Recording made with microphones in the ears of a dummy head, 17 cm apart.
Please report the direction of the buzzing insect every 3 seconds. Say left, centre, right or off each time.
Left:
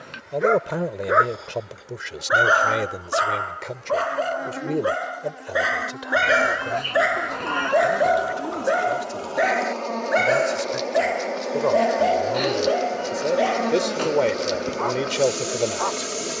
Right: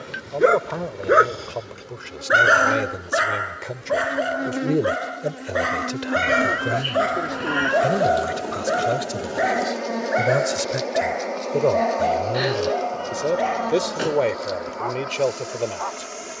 right, right, right, centre, left, left.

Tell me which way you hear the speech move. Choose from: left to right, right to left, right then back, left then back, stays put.
right then back.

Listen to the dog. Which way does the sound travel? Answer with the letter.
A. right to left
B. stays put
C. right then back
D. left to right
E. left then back
A.